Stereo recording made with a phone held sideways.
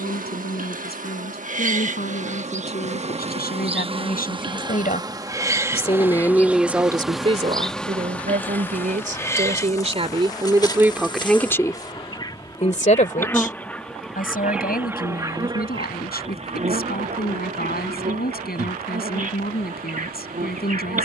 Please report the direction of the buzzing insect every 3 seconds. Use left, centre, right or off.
right, right, centre, left, centre, right, right.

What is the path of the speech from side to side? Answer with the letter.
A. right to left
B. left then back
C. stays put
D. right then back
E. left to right
D.